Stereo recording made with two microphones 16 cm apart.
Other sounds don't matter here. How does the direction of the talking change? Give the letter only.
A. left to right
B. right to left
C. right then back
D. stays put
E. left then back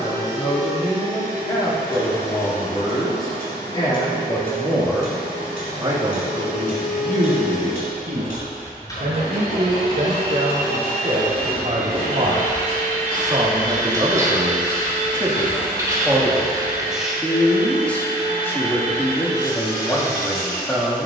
C.